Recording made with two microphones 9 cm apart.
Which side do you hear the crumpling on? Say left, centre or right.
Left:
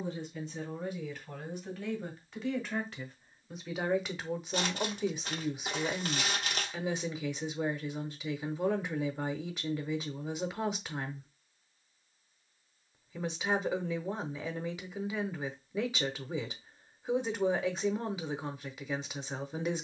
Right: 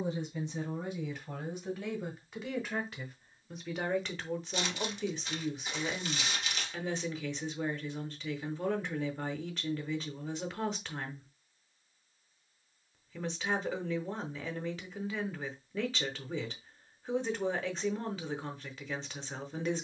left.